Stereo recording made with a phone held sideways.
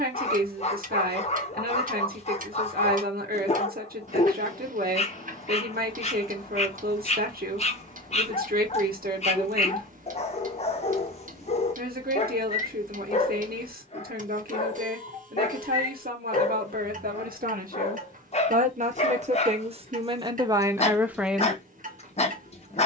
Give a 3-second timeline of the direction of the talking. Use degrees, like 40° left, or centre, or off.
70° right, 70° right, 70° right, 70° right, 70° right, 70° right, 40° right, 10° right.